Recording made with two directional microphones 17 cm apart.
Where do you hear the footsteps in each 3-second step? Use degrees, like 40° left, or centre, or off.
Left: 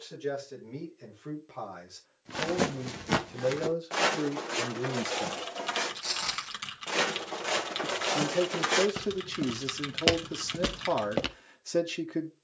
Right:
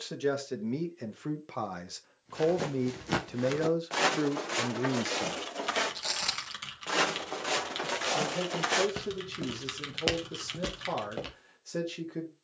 40° left, 10° right, centre, 30° left.